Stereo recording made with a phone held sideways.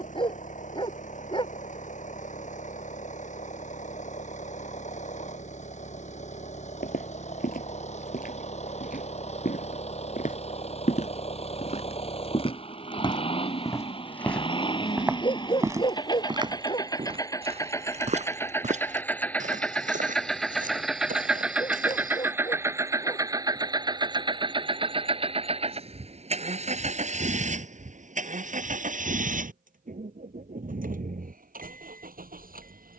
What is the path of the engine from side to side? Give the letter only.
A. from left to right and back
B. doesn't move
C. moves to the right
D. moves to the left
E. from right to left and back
C.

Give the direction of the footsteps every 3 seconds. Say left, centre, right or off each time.
off, off, left, left, left, right, right, right, off, off, off.